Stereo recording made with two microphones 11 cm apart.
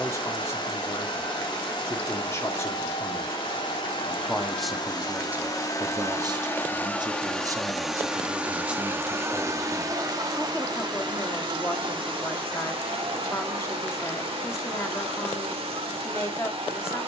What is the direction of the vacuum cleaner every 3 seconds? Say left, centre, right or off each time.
left, left, centre, right, right, right.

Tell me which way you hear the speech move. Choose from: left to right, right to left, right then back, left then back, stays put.
right then back.